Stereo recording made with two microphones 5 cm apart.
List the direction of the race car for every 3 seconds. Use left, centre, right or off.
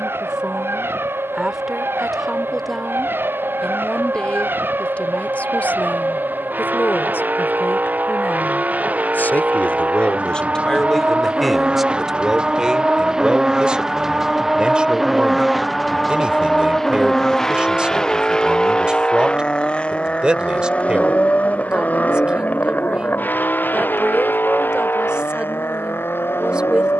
right, right, right, right, centre, centre, left, left, left.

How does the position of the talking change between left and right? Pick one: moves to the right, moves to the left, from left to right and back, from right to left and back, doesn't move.
from right to left and back.